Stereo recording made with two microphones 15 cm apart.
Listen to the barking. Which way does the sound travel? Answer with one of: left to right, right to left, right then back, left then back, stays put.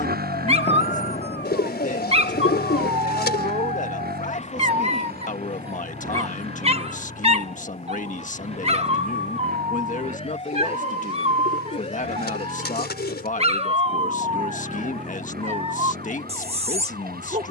stays put.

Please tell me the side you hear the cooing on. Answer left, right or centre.
left.